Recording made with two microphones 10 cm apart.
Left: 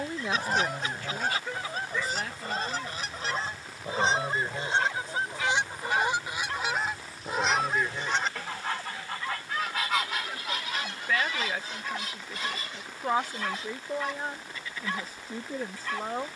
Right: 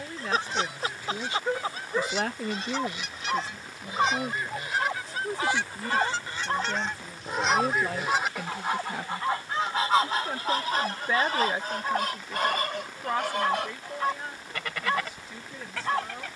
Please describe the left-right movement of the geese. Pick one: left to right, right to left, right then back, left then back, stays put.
left to right.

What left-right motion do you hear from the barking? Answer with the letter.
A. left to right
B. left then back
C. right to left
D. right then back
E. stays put
E.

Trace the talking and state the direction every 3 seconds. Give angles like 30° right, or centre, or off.
30° right, 70° right, 70° right, 30° right, 20° left, 40° left.